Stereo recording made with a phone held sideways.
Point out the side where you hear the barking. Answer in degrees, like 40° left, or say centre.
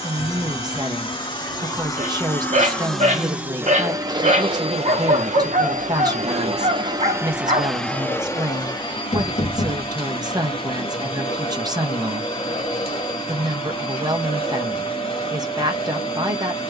50° right.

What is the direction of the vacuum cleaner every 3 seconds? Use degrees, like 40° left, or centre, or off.
30° left, 30° right, 10° right, 40° left, 40° left, 40° left.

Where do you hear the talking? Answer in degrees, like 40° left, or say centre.
30° right.